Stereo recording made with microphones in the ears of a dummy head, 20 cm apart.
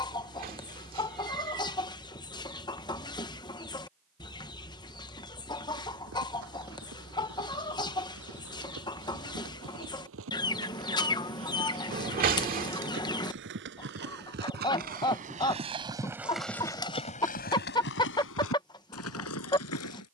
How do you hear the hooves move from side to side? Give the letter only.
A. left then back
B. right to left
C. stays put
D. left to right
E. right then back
B.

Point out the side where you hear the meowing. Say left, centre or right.
right.